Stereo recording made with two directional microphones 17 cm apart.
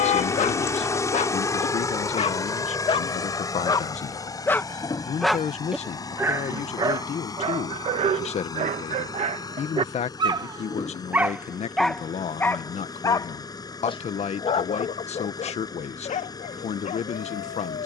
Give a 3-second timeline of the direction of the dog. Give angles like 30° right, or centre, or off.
40° left, 10° left, 30° right, 20° right, 30° left, 50° left.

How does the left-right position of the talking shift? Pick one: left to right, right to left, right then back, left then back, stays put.
stays put.